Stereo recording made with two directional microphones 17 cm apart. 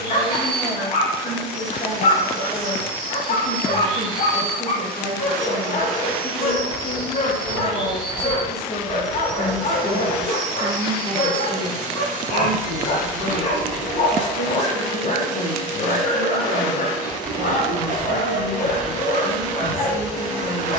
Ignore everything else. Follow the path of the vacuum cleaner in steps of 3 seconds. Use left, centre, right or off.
left, centre, right, right, right, right, right.